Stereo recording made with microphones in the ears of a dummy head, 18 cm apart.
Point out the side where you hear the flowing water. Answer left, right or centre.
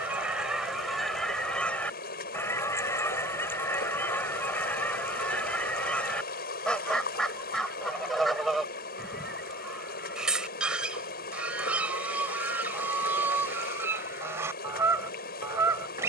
left.